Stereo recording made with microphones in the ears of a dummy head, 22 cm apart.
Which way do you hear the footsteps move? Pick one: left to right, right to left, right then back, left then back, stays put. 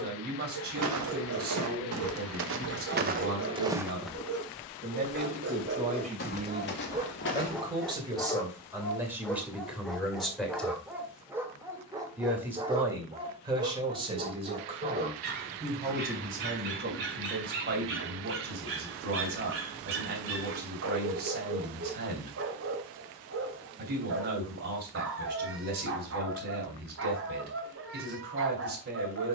right to left.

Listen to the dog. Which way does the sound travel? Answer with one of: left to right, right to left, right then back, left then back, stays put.
left then back.